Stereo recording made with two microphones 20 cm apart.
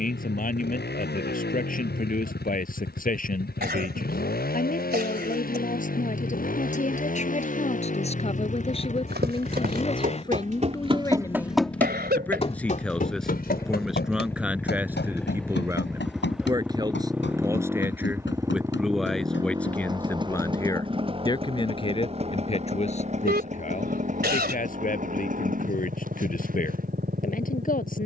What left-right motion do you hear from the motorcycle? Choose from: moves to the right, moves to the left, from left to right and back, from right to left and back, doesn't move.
moves to the right.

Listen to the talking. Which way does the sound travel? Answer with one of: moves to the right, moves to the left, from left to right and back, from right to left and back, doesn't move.
from left to right and back.